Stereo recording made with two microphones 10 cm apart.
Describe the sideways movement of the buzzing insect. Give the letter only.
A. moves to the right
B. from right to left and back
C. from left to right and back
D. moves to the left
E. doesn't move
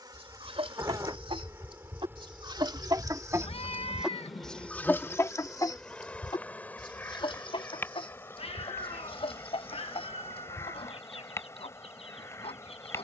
D.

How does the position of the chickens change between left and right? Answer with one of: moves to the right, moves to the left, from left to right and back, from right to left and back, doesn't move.
moves to the left.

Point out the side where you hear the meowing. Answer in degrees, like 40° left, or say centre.
70° left.